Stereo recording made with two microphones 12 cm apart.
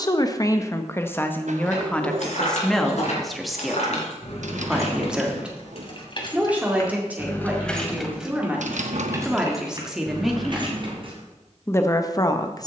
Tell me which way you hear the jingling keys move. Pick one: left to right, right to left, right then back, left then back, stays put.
left to right.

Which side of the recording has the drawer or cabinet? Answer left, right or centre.
right.